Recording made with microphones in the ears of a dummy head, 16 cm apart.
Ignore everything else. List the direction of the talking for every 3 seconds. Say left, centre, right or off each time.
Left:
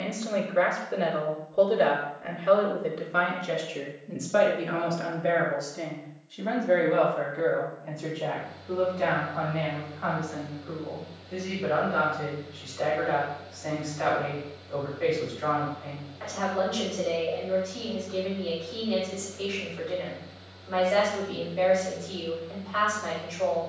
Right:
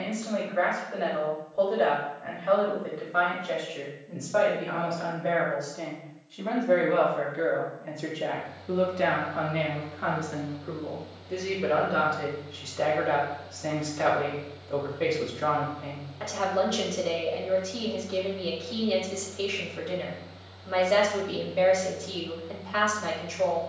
left, left, centre, right, right, right, right, right.